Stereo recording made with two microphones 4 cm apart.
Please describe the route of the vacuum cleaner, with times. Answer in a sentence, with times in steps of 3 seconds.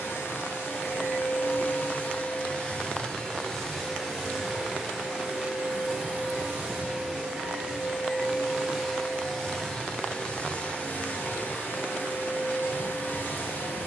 You can hear the vacuum cleaner on the left from 0 s, in the centre from 3 s and on the left from 9 s.